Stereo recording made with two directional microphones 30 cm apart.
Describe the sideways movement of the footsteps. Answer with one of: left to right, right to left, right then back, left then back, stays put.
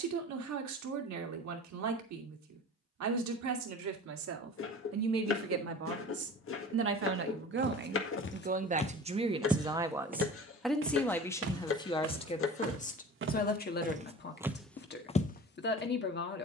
right then back.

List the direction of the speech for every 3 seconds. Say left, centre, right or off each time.
right, right, right, centre, left, left.